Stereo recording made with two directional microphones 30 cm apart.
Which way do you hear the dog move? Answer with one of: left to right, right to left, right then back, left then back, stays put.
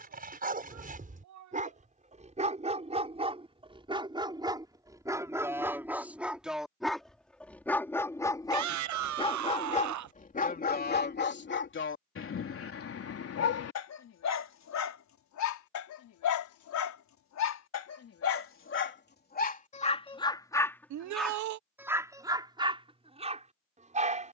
left then back.